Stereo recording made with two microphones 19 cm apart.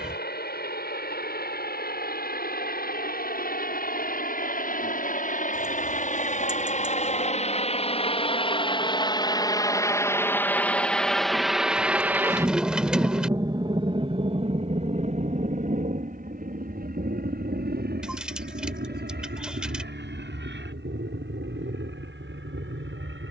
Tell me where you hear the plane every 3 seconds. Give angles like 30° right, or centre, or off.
60° left, 50° left, 40° left, 10° left, 20° right, 40° right, 60° right, 70° right.